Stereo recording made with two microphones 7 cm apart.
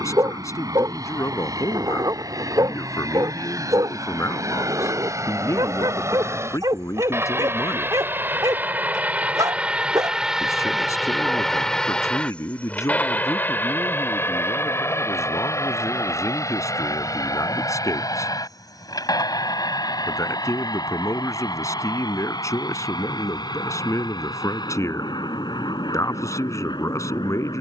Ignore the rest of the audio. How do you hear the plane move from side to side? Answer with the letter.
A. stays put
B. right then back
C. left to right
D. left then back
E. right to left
E.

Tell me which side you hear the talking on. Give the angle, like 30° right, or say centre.
50° left.